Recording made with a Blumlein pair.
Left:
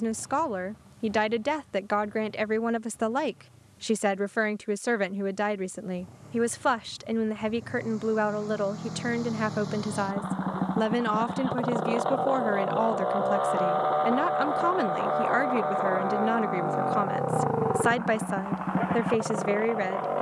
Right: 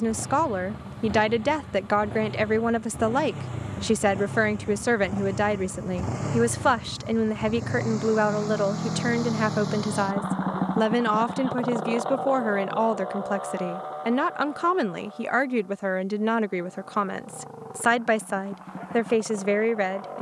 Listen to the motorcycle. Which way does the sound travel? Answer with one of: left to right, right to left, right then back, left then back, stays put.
right to left.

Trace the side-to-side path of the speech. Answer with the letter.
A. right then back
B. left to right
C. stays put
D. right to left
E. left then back
C.